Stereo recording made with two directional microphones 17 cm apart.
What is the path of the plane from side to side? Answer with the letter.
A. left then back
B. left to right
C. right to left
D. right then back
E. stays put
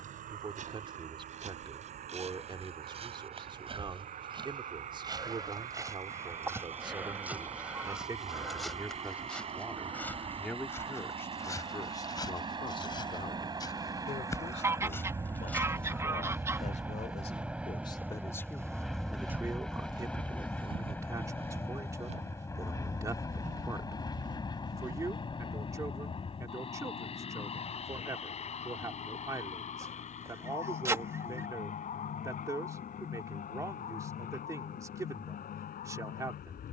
C.